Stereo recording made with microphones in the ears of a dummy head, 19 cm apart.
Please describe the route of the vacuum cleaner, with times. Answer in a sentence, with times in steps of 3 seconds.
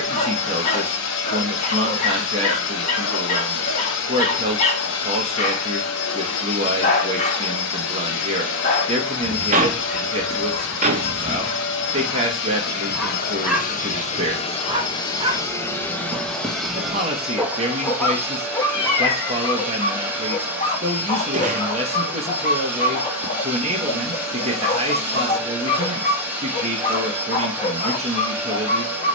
In this clip you hear the vacuum cleaner on the left from 0 s and in the centre from 15 s.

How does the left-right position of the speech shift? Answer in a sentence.
In this clip you hear the speech stay put.